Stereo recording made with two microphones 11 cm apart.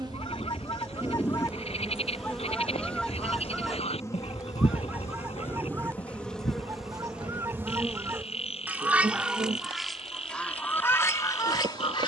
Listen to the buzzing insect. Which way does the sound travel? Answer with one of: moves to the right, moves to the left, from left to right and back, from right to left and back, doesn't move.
from right to left and back.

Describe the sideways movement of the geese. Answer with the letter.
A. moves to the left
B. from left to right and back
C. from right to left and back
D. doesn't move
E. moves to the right
B.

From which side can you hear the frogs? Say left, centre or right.
left.